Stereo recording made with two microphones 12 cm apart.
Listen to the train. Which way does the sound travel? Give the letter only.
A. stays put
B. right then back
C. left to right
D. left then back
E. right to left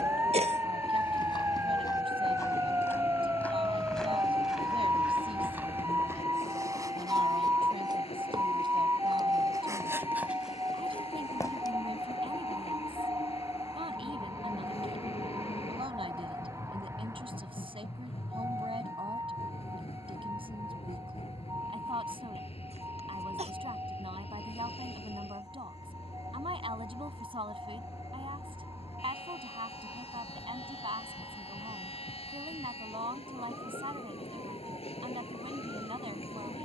A.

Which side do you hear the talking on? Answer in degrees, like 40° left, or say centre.
50° right.